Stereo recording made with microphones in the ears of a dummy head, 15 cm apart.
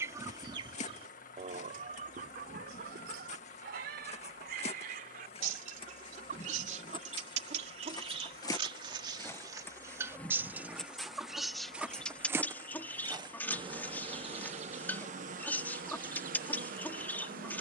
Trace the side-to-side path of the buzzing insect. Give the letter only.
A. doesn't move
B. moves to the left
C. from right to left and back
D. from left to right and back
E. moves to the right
E.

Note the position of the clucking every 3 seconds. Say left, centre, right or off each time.
right, right, right, centre, centre, centre.